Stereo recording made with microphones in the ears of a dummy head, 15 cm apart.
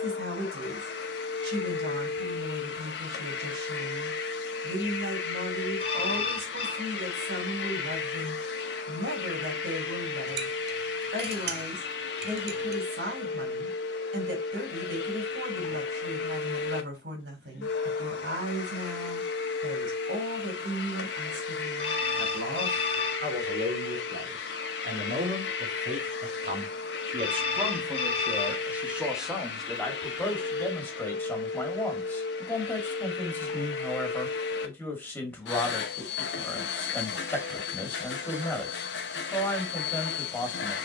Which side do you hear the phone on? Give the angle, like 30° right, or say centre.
30° left.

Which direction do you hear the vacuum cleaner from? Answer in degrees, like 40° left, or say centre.
80° left.